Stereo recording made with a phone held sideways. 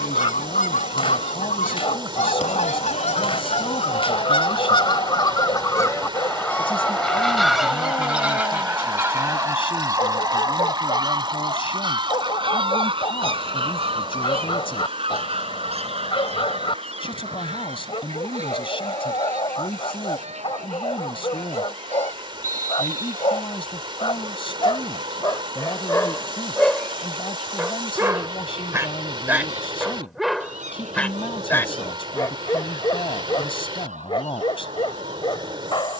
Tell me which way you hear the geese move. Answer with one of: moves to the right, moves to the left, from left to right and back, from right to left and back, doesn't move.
moves to the right.